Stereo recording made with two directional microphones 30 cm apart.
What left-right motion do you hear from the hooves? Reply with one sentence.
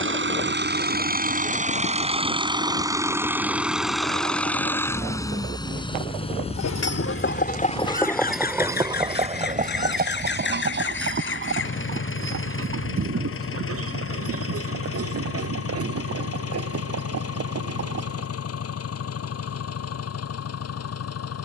You can hear the hooves move to the right.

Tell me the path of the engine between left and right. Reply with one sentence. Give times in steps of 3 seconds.
You can hear the engine on the right from 0 s, in the centre from 3 s and on the left from 6 s.